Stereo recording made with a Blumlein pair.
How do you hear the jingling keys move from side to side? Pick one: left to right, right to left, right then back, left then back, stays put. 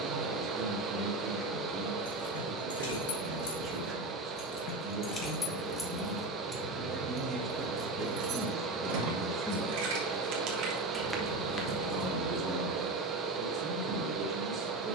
right then back.